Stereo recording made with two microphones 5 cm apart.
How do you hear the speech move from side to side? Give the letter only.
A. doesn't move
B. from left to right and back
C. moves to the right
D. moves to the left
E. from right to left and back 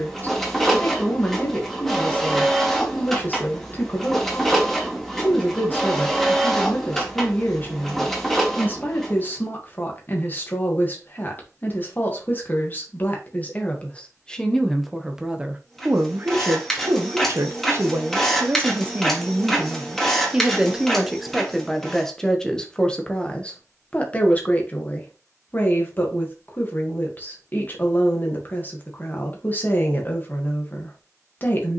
B.